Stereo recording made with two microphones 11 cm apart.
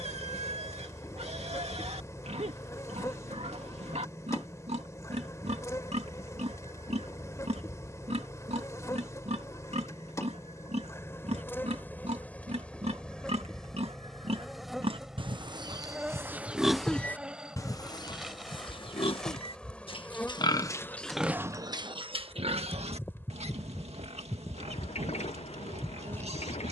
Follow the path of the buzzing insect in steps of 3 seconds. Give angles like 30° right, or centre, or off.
30° left, 30° left, 30° left, 30° left, 10° left, 10° right, 10° left, 20° left, 20° left.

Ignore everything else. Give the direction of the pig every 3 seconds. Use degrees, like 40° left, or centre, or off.
80° right, 80° right, 80° right, 80° right, 70° right, 10° right, 50° left, 50° right, 70° right.